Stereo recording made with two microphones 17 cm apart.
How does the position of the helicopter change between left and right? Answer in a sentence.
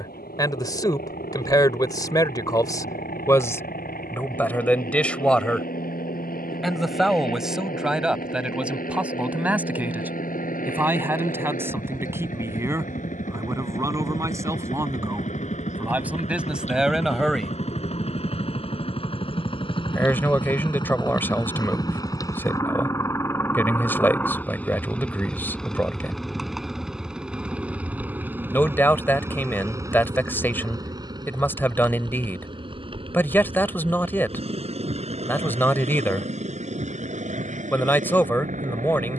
In this clip you hear the helicopter move to the right.